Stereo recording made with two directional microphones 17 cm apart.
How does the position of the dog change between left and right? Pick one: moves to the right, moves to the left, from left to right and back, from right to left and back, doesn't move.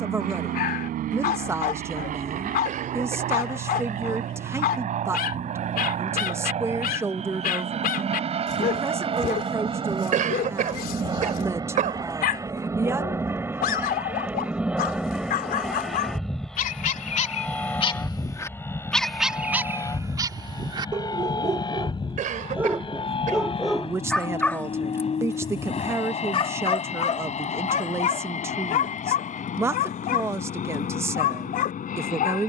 from left to right and back.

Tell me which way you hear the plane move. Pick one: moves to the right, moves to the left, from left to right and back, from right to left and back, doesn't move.
moves to the left.